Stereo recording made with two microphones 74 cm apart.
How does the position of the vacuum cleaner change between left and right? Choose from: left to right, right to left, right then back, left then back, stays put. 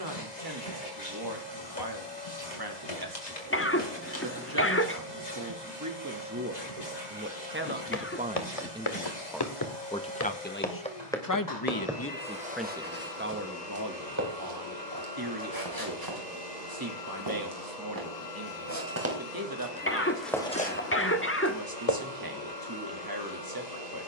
stays put.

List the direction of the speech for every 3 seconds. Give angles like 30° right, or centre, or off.
30° right, 30° right, 20° right, 20° left, 10° right, 30° right, 30° right, 30° right.